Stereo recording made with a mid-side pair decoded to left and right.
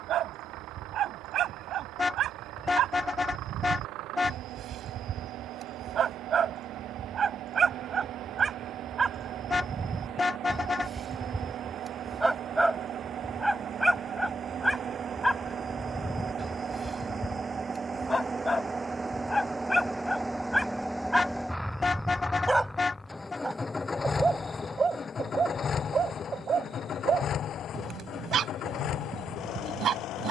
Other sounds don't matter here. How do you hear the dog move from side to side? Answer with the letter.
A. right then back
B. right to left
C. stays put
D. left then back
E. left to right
D.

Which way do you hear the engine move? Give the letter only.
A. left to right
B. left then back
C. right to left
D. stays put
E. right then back
C.